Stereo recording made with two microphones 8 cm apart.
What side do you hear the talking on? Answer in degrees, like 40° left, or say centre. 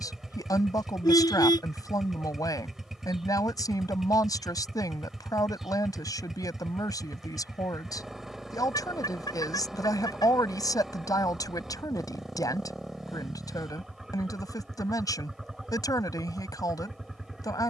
60° left.